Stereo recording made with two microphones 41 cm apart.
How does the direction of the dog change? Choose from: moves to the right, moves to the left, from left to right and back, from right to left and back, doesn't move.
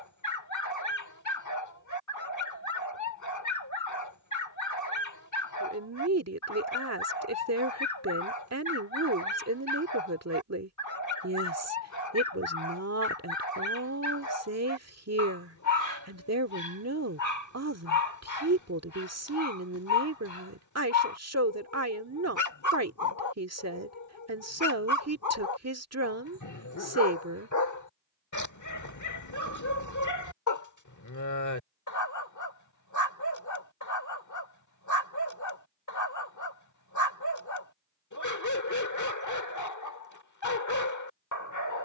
doesn't move.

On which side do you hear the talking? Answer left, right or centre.
right.